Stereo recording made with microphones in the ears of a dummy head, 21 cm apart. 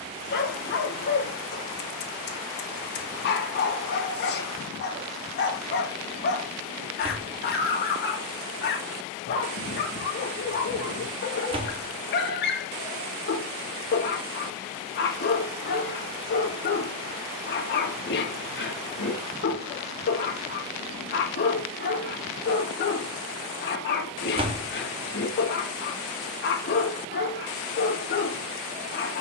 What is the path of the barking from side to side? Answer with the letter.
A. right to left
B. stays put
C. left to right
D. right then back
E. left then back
B.